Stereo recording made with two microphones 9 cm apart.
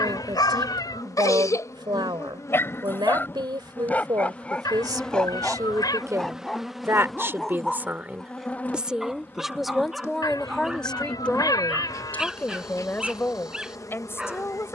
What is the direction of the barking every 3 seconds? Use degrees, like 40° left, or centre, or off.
40° left, 10° left, centre, 10° right, 10° right.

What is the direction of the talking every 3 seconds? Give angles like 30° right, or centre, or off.
60° right, 50° right, 20° right, centre, 20° left.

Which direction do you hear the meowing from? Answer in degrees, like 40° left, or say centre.
50° left.